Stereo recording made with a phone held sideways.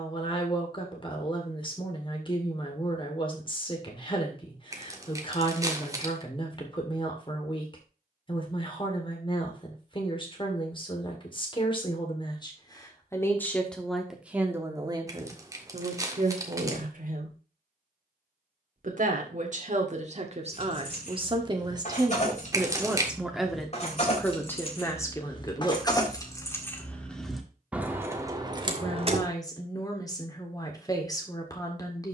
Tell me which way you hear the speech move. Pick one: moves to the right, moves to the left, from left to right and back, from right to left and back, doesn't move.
from left to right and back.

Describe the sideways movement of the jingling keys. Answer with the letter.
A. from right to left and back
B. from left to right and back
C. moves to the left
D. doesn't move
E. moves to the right
E.